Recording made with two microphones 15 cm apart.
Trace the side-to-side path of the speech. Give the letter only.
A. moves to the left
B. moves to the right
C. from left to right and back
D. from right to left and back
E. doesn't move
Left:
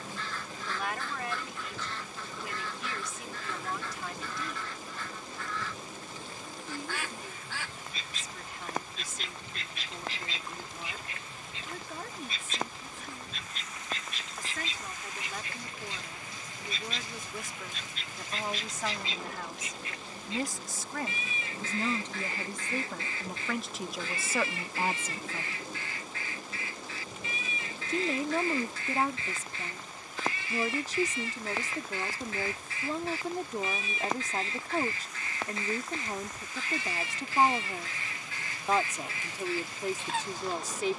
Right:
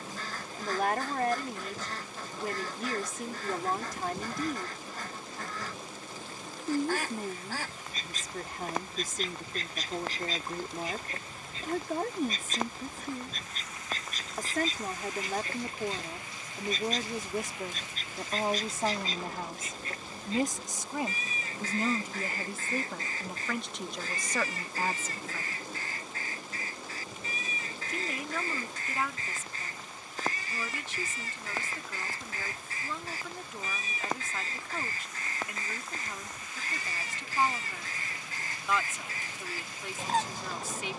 A.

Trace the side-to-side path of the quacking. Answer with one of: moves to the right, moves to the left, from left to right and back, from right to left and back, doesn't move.
doesn't move.